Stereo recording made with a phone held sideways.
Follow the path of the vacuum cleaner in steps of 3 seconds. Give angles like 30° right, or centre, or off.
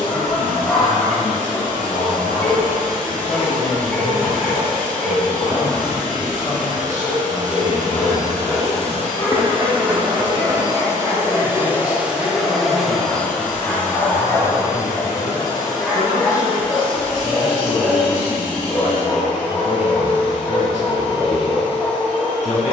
70° right, 70° right, 60° right, 30° right, 10° left, 30° left, 50° left, 50° left.